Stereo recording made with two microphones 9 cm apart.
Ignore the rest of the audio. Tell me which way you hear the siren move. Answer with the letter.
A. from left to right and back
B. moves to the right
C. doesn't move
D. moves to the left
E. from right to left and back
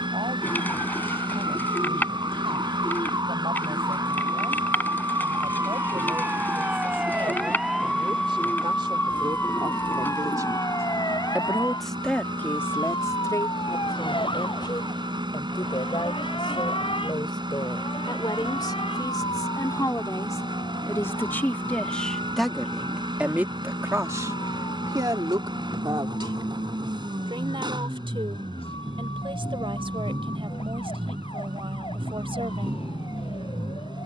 D.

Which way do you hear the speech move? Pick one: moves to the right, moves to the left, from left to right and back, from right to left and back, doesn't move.
from right to left and back.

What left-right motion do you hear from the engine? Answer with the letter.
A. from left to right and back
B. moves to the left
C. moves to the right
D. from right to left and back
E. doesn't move
E.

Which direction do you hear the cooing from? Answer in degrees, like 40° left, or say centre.
20° left.